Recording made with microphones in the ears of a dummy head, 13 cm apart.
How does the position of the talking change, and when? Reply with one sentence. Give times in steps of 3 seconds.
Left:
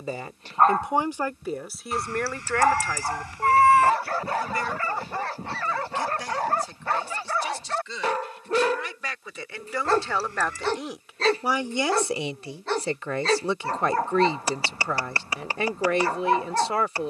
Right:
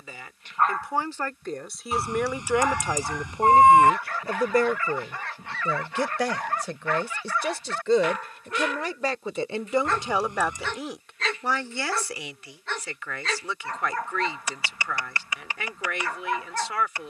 You can hear the talking in the centre from 0 s, on the right from 3 s, in the centre from 9 s and on the left from 12 s.